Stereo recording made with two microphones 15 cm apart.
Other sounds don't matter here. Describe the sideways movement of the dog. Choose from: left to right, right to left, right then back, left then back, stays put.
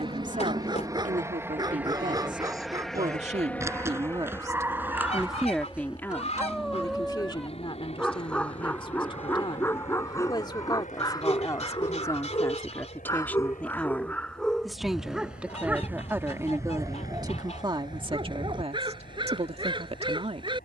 left then back.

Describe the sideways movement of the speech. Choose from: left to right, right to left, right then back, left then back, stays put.
left then back.